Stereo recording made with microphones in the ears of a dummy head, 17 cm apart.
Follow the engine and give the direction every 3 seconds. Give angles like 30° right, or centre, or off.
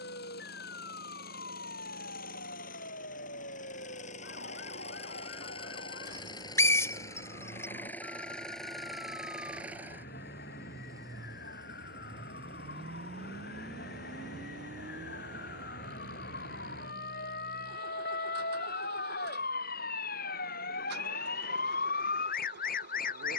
50° left, 40° left, 10° left, 10° right, 40° right, 50° right, 60° right, 60° right.